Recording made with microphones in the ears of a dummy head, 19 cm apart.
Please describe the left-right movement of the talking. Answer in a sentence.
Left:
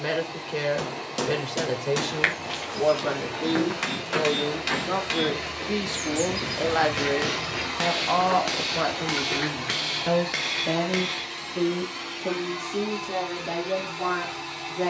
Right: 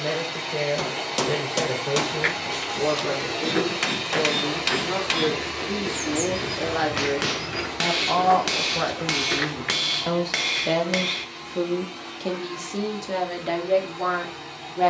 You can hear the talking go from the left side to the right.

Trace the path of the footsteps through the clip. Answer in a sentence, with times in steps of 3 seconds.
In this clip you hear the footsteps on the left from 0 s, in the centre from 3 s, on the right from 6 s and not at all from 12 s.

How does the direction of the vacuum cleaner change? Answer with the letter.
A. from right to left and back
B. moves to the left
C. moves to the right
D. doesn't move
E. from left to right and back
B.